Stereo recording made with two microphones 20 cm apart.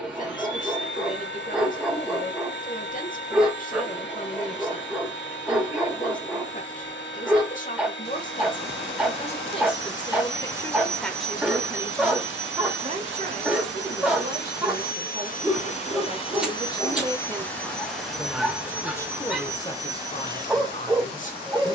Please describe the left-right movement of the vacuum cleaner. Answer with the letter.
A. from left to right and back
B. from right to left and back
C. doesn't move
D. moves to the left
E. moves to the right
E.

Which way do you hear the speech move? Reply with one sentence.
In this clip you hear the speech move from left to right and back again.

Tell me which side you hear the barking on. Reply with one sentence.
In this clip you hear the barking in the centre.